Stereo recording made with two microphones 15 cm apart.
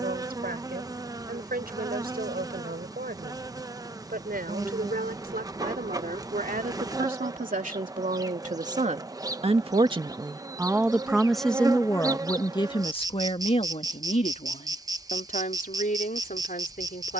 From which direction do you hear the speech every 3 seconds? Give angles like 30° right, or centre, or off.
80° right, 80° right, 60° right, 20° right, 40° left, 60° left.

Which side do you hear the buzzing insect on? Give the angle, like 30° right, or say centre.
20° right.